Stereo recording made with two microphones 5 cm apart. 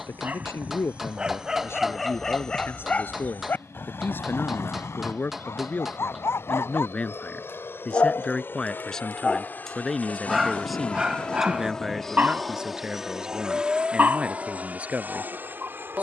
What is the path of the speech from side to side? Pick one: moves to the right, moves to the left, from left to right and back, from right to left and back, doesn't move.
moves to the right.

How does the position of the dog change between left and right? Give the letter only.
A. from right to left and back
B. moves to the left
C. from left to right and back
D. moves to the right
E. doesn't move
A.